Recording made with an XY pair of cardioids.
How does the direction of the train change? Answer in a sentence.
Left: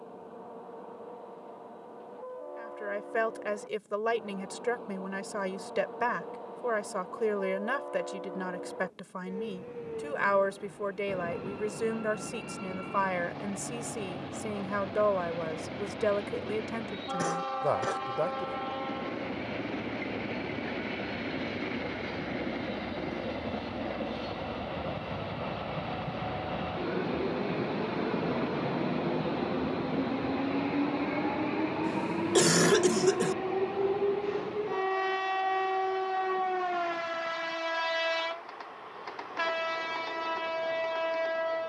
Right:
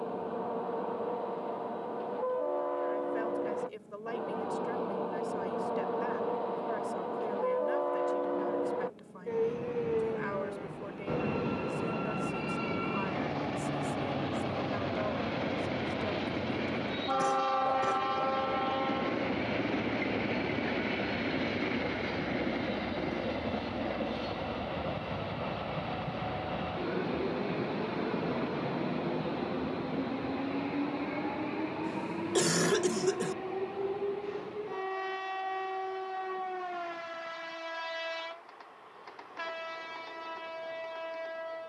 In this clip you hear the train go from the right side to the left.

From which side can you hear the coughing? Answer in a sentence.
In this clip you hear the coughing on the left.